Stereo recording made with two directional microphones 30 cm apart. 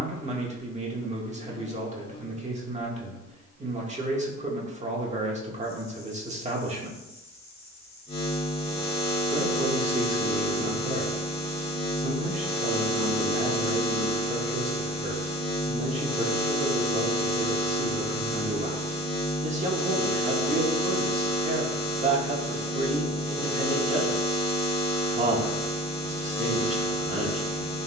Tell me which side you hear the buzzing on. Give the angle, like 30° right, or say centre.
20° left.